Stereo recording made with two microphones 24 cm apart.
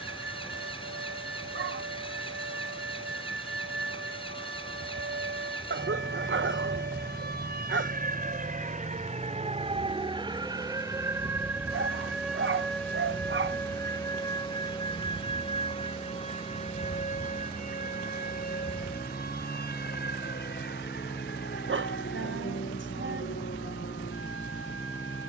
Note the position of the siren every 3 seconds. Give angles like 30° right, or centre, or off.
70° right, 60° right, 40° right, 20° right, 10° left, 30° left, 40° left, 50° left, 50° left.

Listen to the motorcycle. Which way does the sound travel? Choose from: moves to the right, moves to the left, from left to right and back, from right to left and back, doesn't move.
doesn't move.